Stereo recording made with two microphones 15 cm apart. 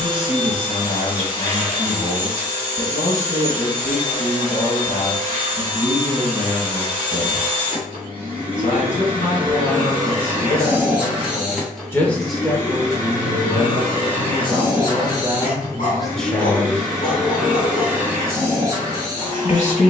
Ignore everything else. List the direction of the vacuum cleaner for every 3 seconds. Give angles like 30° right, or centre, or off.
40° right, 40° right, 40° right, 20° right, 30° left, 10° left, 30° right.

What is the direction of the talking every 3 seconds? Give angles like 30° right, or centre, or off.
60° left, 60° left, 60° left, 50° left, 30° right, centre, 60° left.